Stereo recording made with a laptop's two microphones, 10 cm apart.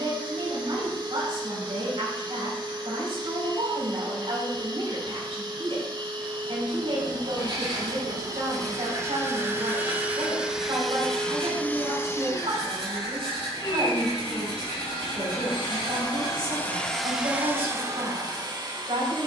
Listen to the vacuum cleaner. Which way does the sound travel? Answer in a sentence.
You can hear the vacuum cleaner go left and come back.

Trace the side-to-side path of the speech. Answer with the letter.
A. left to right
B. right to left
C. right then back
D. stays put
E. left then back
D.